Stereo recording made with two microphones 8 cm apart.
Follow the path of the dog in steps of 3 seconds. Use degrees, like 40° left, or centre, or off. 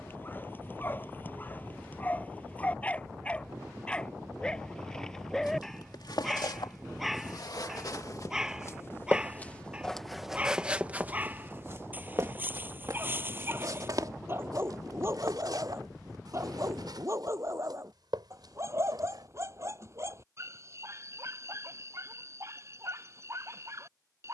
20° left, 10° left, centre, 20° right, 30° right, 40° right, 40° right, 40° right.